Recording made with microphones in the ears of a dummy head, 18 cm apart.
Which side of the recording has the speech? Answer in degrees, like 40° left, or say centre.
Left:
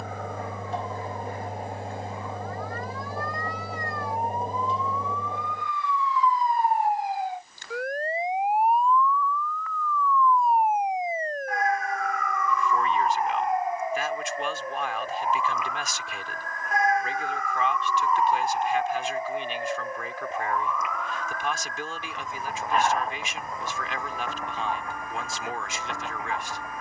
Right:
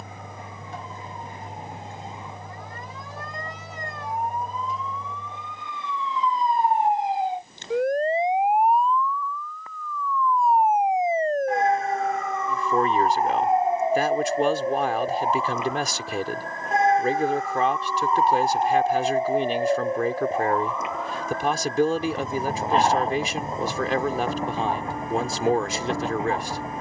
30° right.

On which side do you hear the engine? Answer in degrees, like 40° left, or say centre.
30° left.